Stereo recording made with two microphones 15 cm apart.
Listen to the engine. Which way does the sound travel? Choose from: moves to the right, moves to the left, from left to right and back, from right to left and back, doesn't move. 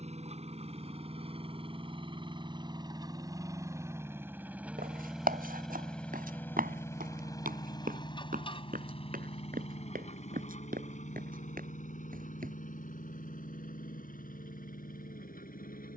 moves to the left.